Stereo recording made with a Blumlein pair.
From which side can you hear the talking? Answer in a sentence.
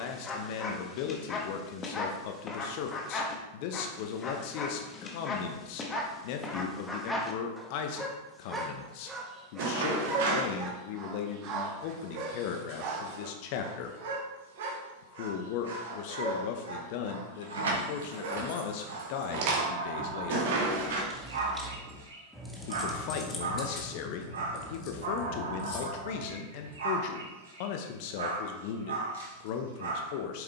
You can hear the talking on the left.